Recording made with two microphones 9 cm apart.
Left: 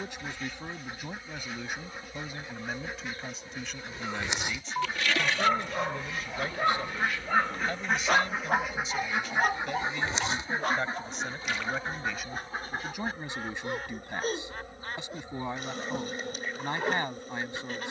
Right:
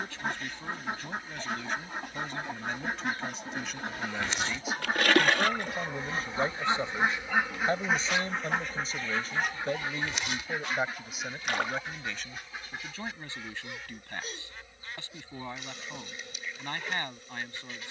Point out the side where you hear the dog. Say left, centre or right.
left.